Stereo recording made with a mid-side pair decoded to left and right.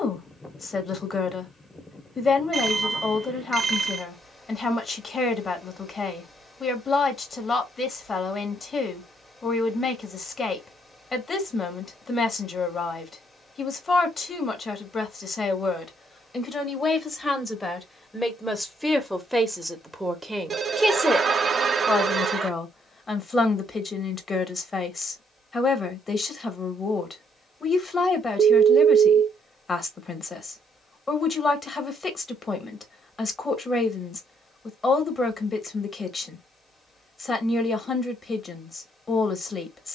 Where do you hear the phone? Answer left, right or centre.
right.